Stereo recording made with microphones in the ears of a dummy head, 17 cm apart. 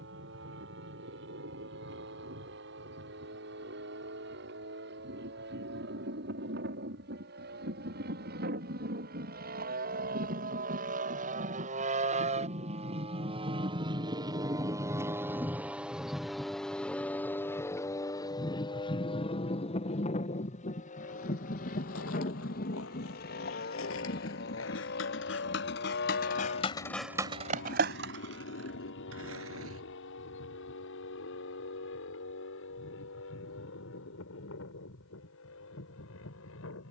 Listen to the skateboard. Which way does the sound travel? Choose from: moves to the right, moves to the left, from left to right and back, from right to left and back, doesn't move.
moves to the right.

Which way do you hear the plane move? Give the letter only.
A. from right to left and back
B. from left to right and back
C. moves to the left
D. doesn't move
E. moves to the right
C.